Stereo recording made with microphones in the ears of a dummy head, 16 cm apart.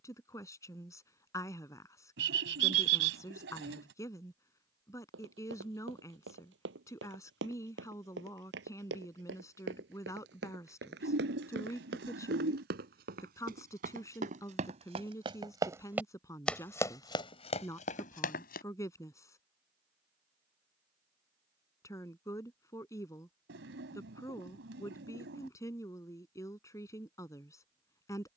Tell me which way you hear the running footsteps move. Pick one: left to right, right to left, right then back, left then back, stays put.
right to left.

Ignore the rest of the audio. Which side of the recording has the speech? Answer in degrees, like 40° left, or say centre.
20° left.